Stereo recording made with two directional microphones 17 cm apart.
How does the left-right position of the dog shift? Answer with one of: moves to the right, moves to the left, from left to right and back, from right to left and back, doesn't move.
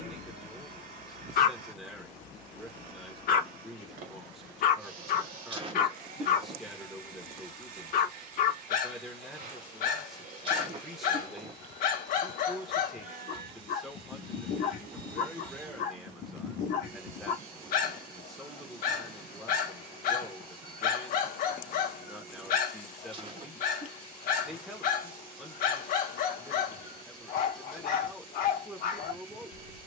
doesn't move.